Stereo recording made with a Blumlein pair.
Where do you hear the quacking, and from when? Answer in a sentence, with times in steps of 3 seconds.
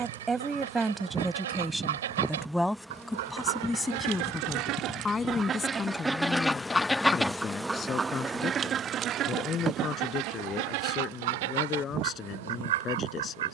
In this clip you hear the quacking on the right from 0 s, in the centre from 6 s and on the right from 9 s.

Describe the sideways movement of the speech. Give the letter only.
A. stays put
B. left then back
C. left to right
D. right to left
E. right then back
D.